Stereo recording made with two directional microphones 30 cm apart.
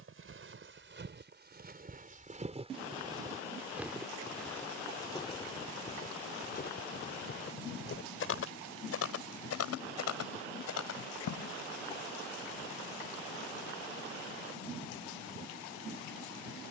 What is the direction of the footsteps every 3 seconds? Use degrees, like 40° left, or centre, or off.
30° right, 10° left, 40° left, 60° left, off, off.